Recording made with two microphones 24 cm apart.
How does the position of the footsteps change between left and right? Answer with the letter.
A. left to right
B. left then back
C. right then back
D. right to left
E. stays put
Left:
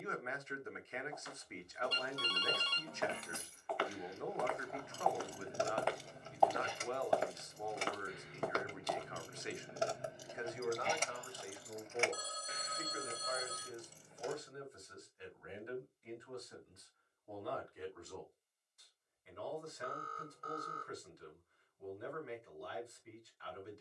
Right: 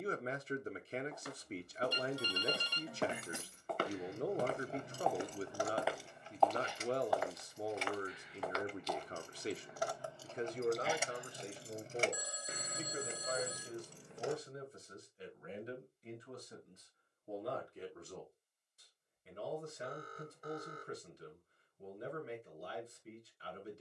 D.